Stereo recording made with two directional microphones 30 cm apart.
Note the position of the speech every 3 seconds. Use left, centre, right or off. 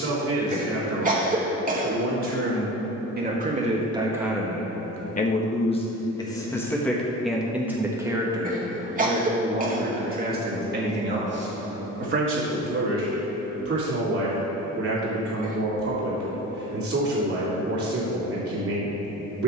right, centre, centre, right, right, right, right.